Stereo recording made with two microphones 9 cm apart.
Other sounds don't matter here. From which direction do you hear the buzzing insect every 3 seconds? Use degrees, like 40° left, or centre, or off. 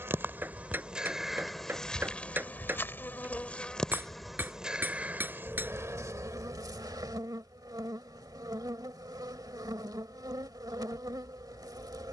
centre, 10° right, 40° right, 40° right.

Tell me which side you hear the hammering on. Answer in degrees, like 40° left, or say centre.
20° right.